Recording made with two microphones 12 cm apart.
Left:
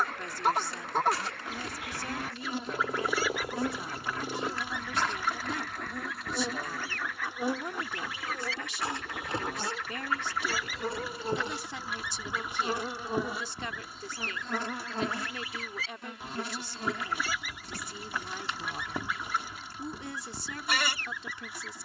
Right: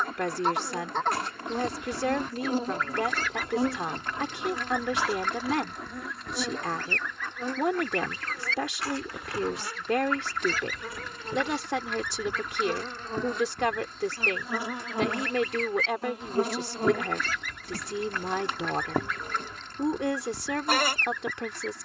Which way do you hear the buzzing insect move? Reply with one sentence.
In this clip you hear the buzzing insect go left and come back.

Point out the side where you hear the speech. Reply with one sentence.
In this clip you hear the speech on the right.